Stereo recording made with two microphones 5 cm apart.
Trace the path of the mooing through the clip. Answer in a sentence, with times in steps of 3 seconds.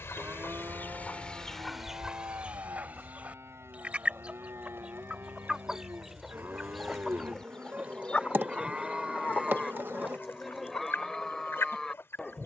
In this clip you hear the mooing on the right from 0 s and in the centre from 9 s.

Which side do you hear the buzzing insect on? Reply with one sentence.
You can hear the buzzing insect on the right.